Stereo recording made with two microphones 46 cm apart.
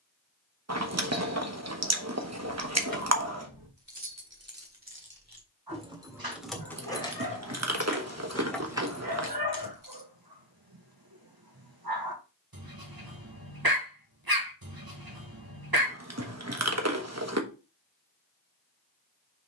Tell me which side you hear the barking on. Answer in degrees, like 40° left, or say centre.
50° right.